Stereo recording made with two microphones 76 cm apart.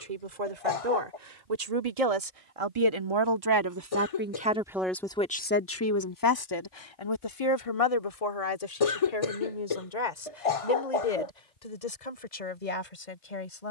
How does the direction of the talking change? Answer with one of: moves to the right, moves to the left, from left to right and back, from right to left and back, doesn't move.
moves to the left.